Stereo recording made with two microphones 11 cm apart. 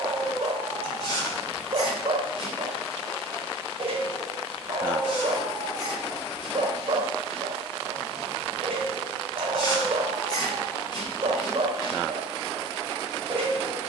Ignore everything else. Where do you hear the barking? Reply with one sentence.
In this clip you hear the barking on the right.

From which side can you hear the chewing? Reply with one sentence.
You can hear the chewing on the left.